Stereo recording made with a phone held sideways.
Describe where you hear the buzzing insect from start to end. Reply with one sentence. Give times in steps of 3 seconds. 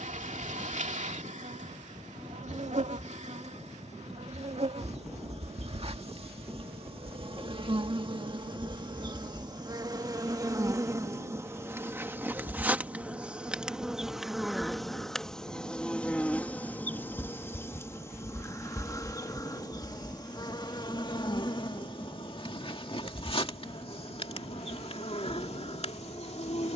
You can hear the buzzing insect on the right from 0 s, in the centre from 12 s and on the left from 18 s.